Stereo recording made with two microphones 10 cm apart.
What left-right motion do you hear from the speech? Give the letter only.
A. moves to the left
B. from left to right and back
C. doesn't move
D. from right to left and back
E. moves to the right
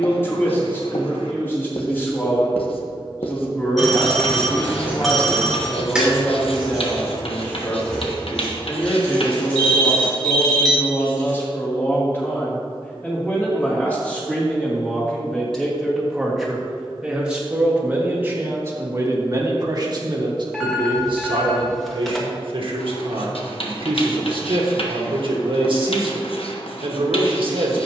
E.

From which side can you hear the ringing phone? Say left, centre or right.
centre.